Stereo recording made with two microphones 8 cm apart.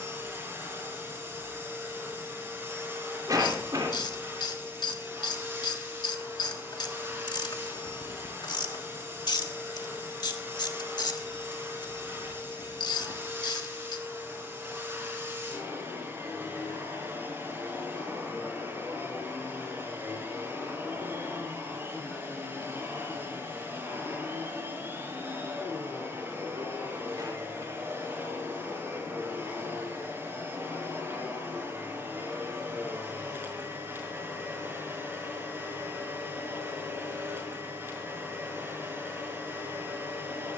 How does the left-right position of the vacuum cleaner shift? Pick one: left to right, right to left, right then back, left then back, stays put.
stays put.